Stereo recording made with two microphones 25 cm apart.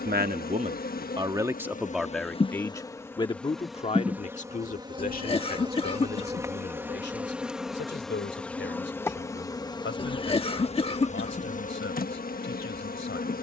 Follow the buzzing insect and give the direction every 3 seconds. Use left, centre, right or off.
left, centre, centre, left, left.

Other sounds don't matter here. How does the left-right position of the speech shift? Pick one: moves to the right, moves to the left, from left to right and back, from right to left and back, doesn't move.
moves to the left.